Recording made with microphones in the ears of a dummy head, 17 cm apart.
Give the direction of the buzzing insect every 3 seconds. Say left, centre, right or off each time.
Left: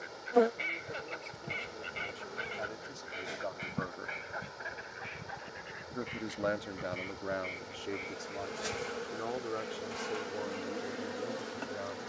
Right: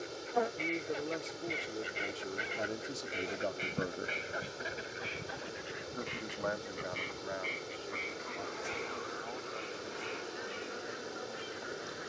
left, centre, left, left.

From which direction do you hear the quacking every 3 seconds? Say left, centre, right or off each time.
centre, right, right, right.